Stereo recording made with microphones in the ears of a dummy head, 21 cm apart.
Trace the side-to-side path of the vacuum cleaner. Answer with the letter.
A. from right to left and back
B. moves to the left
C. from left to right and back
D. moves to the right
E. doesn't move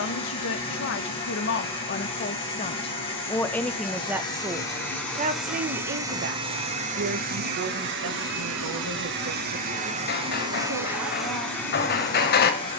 C.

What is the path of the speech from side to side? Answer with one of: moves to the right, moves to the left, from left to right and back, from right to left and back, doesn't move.
moves to the right.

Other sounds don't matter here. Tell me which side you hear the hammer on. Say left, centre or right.
left.